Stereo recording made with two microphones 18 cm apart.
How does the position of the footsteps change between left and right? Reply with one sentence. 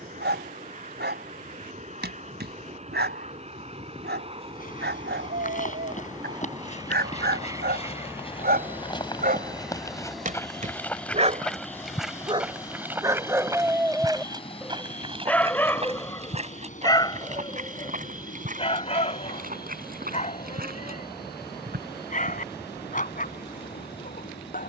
In this clip you hear the footsteps travel towards the right.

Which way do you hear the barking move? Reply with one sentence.
You can hear the barking move to the left.